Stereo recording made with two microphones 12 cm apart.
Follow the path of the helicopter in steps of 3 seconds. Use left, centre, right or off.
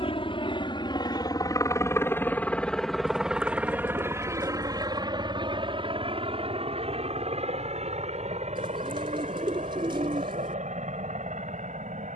left, right, right, right.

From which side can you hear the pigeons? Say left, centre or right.
right.